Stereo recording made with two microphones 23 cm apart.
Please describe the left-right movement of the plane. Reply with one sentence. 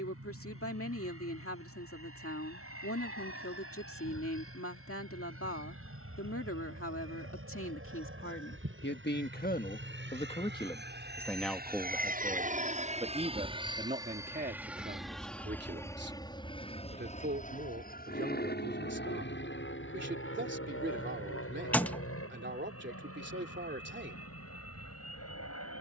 In this clip you hear the plane move to the left.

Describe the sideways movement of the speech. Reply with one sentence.
You can hear the speech travel towards the right.